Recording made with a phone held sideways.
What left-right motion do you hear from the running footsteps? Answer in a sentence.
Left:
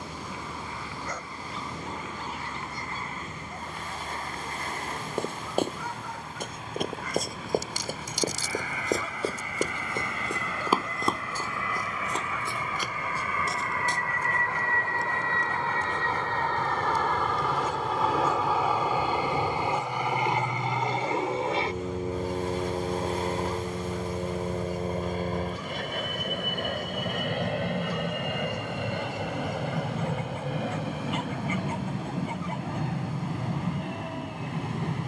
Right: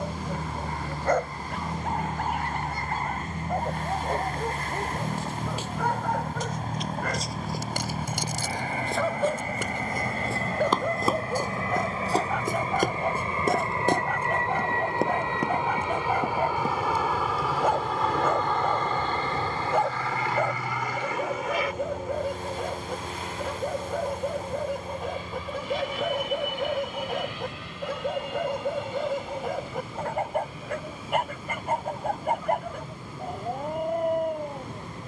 You can hear the running footsteps go from the left side to the right.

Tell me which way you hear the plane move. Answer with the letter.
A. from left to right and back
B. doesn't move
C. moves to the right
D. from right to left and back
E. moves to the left
E.